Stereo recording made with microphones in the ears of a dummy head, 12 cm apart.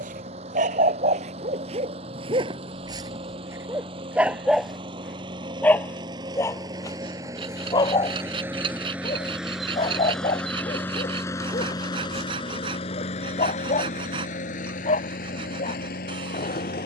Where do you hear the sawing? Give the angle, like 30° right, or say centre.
40° right.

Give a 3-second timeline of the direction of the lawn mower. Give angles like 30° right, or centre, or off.
50° right, 40° right, 20° right, 10° left, 50° left, 70° left.